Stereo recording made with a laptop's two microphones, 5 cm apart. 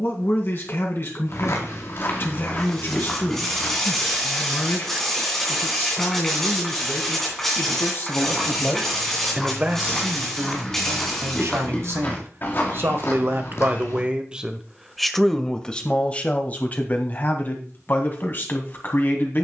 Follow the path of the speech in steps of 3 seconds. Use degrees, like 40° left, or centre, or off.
50° left, 50° left, 50° left, 50° right, 40° right, 30° left, 40° left.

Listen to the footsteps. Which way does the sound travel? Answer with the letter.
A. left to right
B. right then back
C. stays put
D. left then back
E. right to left
B.